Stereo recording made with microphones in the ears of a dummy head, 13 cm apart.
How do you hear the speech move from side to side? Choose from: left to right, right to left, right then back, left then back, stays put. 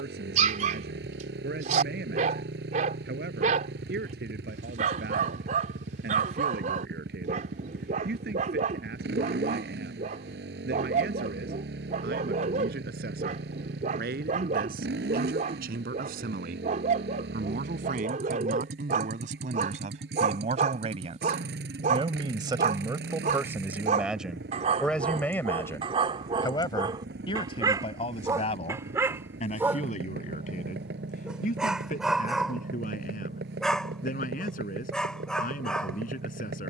right to left.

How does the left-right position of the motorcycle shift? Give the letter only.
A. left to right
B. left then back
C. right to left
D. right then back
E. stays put
E.